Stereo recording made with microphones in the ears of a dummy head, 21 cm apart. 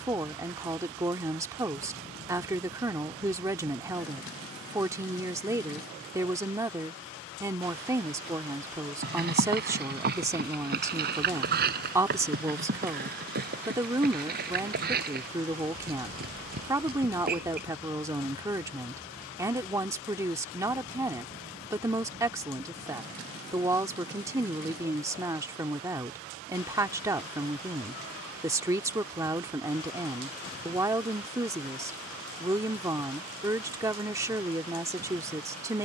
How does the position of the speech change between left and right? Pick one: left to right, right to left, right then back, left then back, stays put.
stays put.